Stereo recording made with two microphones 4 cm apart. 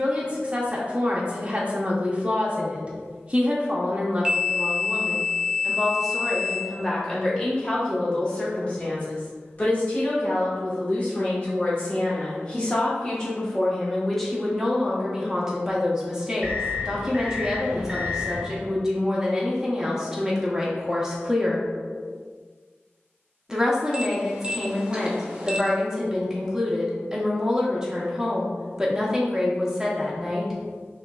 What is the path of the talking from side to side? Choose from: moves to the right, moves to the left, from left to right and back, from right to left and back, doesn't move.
from right to left and back.